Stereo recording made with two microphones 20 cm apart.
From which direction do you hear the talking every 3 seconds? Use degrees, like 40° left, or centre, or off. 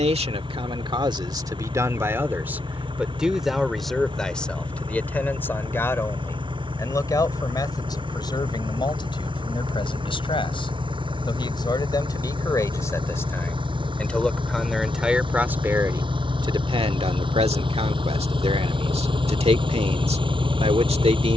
20° right, centre, 20° left, 20° left, 10° left, 20° right, 30° right.